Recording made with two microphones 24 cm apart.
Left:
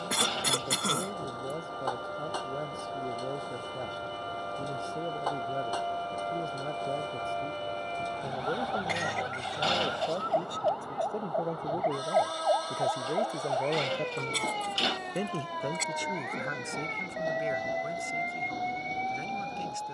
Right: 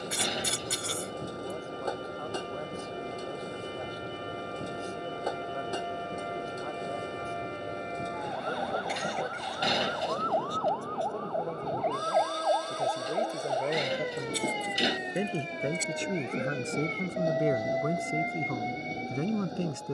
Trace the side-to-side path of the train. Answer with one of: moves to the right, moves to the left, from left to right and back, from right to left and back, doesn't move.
doesn't move.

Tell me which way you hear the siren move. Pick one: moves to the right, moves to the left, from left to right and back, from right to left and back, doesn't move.
moves to the right.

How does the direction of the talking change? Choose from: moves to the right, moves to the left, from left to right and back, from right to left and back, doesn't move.
moves to the right.